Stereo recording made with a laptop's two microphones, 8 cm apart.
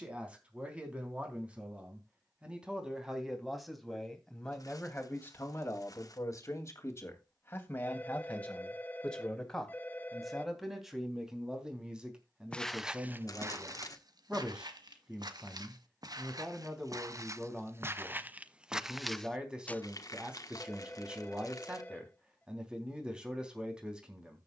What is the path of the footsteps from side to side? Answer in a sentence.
In this clip you hear the footsteps move from left to right and back again.